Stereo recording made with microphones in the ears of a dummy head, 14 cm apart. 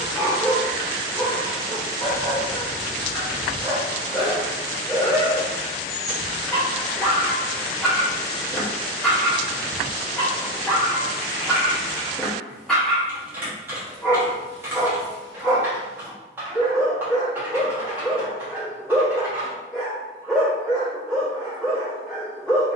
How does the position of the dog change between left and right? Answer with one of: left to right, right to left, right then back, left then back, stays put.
stays put.